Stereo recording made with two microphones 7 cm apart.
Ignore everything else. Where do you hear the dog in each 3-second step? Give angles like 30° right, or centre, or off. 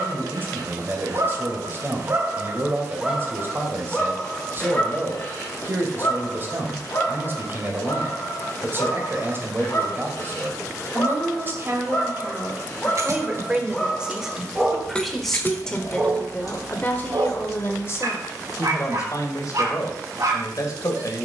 50° right, 20° left, 40° left, 40° left, 10° left, 40° right, 60° right.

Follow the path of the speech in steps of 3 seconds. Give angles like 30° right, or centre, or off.
30° right, 30° right, 30° right, 30° right, 20° right, 20° left, 50° left.